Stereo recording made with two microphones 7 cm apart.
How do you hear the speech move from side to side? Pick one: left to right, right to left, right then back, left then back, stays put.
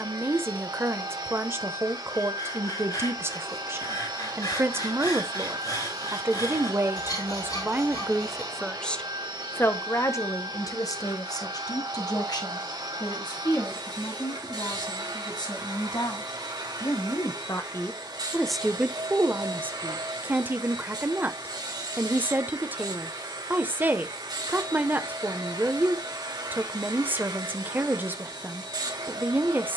left then back.